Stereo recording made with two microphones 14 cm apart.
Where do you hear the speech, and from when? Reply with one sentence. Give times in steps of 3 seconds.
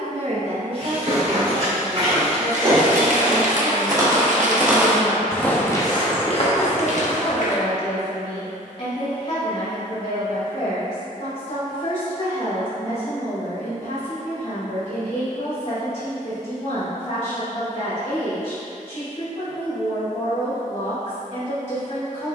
You can hear the speech on the right from 0 s, in the centre from 3 s and on the left from 6 s.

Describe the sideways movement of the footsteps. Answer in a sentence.
You can hear the footsteps go from the right side to the left.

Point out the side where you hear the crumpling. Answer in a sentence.
You can hear the crumpling on the right.